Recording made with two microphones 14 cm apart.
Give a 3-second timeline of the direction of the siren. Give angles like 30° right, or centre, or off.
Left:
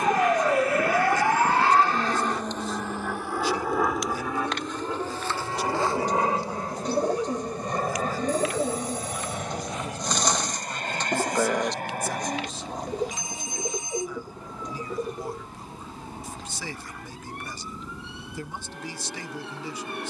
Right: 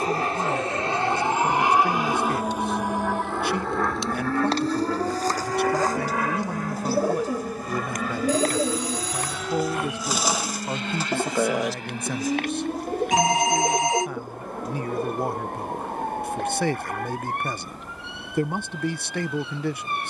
10° left, 30° right, 40° right, 50° right, 50° right, 50° right, 60° right.